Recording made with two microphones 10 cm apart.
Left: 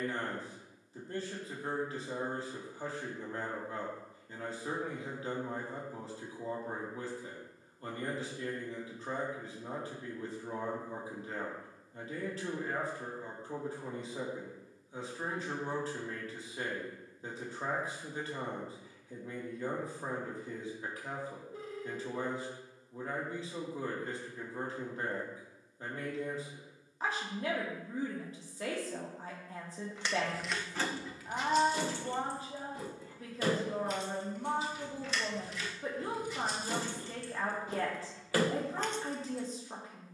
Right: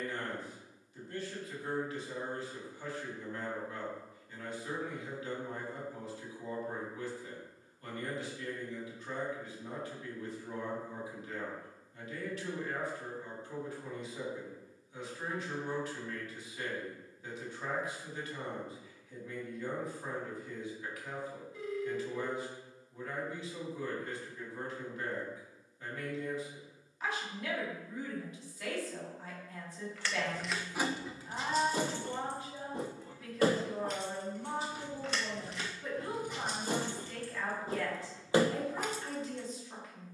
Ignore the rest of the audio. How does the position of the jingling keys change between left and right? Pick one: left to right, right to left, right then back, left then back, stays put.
right then back.